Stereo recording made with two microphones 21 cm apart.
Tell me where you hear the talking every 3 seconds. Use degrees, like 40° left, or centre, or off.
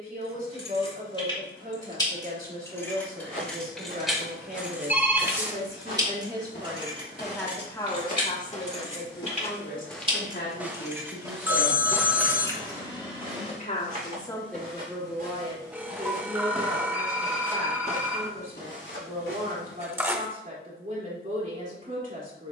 50° right, 50° right, 10° left, 60° left, 20° left, 40° right, 40° right, 40° right.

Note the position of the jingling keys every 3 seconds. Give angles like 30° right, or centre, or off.
20° left, centre, 30° right, 20° right, 20° left, off, off, off.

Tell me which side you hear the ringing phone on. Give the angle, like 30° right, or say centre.
10° right.